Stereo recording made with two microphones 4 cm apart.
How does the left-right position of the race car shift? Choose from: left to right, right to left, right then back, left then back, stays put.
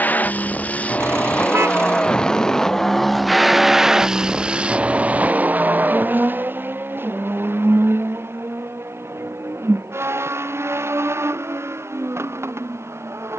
left to right.